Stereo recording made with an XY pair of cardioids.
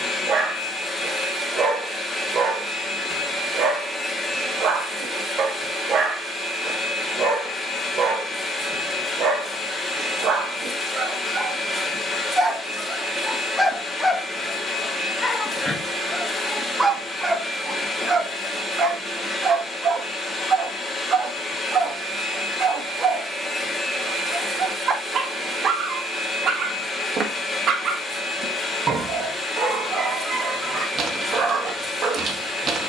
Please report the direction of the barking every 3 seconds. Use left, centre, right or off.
right, right, right, right, centre, centre, right, right, right, right, right.